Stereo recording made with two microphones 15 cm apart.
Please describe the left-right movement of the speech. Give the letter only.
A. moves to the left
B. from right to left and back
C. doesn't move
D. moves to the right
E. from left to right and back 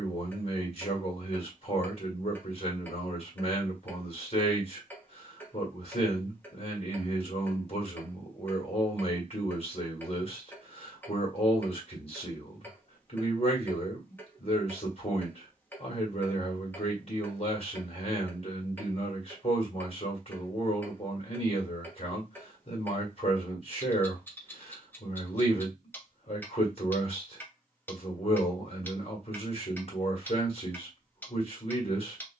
C.